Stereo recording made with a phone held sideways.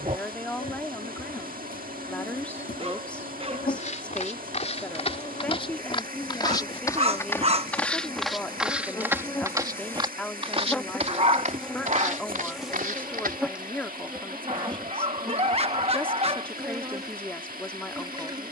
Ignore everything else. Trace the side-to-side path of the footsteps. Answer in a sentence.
You can hear the footsteps go from the left side to the right.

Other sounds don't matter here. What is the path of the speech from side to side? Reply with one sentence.
You can hear the speech stay in one place.